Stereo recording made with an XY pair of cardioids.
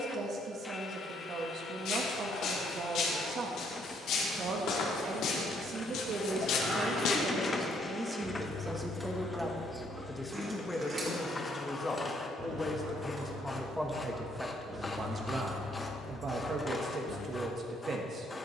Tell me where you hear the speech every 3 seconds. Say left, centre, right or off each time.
right, right, right, centre, centre, right.